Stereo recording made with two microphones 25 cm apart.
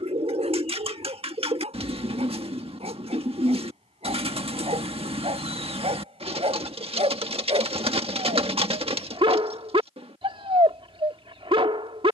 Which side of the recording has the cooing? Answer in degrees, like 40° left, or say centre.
20° right.